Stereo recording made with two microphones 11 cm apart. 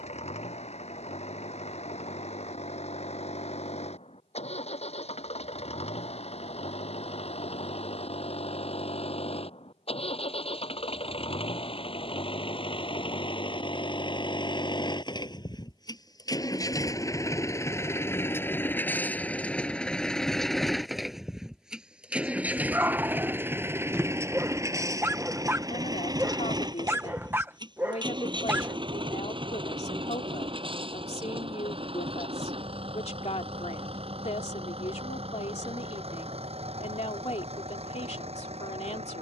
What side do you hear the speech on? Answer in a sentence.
In this clip you hear the speech on the left.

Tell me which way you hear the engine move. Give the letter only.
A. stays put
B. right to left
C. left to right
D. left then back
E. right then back
C.